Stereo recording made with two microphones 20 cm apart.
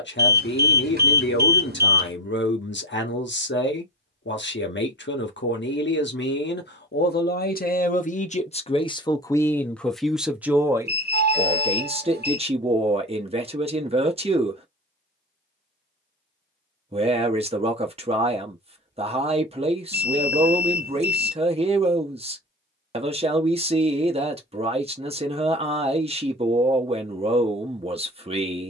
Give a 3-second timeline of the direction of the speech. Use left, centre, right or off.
left, left, left, centre, right, right, right, right, right, right.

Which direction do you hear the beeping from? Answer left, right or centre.
right.